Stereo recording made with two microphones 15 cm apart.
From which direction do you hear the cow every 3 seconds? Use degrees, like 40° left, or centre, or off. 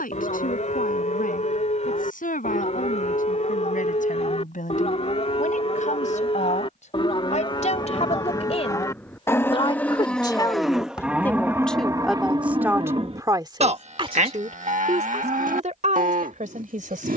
60° left, 50° left, 30° left, centre, 40° right, 70° right.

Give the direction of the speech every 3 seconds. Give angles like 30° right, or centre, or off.
70° left, 60° left, 50° left, 20° left, 20° right, 60° right.